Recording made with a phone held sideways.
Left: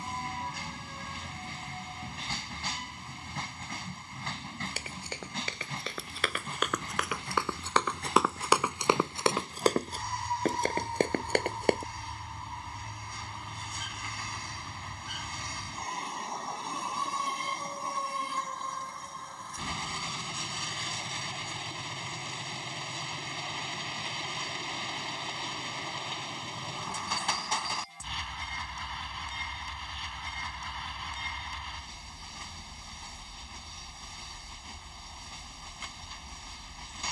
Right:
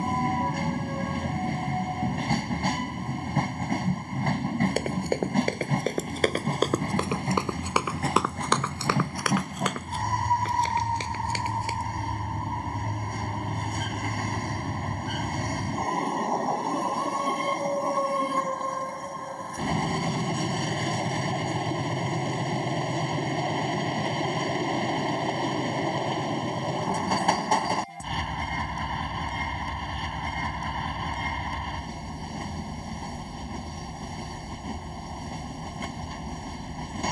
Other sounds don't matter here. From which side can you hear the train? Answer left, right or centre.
right.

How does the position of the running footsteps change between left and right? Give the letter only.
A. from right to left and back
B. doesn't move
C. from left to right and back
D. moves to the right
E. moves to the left
E.